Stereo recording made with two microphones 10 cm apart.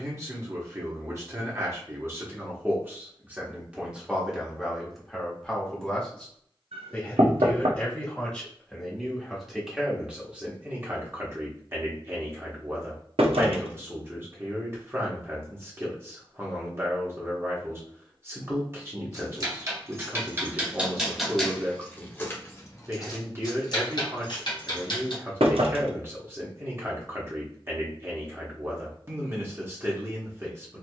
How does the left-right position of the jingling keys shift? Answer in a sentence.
You can hear the jingling keys travel towards the left.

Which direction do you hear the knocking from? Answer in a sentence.
You can hear the knocking on the right.